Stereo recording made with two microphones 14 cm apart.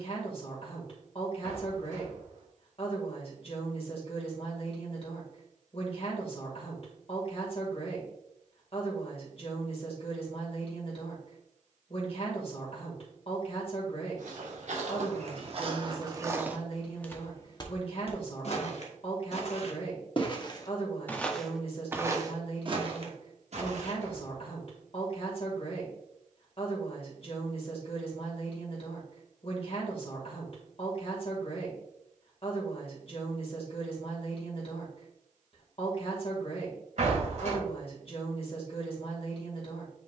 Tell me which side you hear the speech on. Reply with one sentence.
You can hear the speech on the left.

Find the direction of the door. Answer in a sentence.
You can hear the door on the right.